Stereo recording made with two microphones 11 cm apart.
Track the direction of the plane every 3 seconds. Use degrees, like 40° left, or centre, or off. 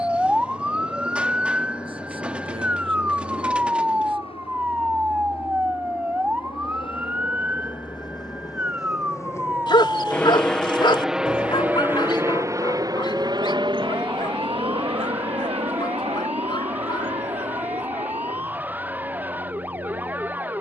70° left, 70° left, 50° left, 10° left, 40° right, 60° right, 70° right.